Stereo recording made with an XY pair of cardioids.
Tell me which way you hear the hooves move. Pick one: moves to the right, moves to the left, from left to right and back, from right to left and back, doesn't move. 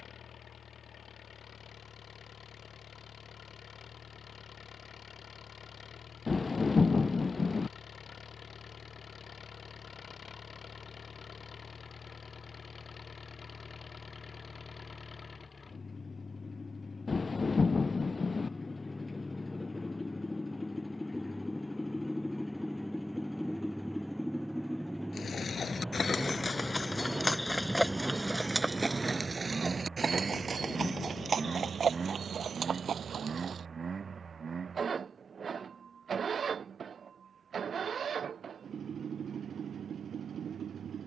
moves to the right.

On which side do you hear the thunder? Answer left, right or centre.
left.